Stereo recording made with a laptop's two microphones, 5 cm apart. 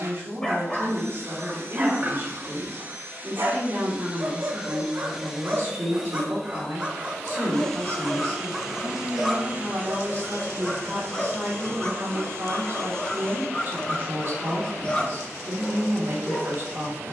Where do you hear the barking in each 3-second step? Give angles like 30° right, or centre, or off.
20° right, 40° right, 10° right, 10° left, 20° left, 20° left.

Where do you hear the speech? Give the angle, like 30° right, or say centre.
50° right.